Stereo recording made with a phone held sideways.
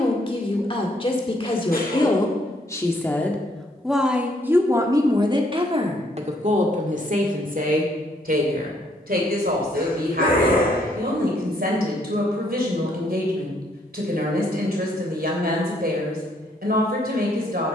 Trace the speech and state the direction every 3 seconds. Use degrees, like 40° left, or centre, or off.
30° left, 10° right, 60° right, 70° right, 70° right, 70° right.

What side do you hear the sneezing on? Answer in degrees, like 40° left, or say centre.
70° left.